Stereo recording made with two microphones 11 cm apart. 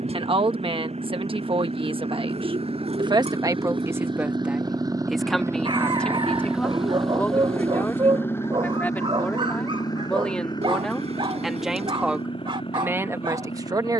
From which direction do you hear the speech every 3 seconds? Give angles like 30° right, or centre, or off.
50° right, 10° right, 20° left, 10° left, 20° right.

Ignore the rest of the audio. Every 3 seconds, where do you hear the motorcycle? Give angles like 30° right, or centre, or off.
70° right, 40° right, 10° left, 40° left, 50° left.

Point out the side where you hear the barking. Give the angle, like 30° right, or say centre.
50° right.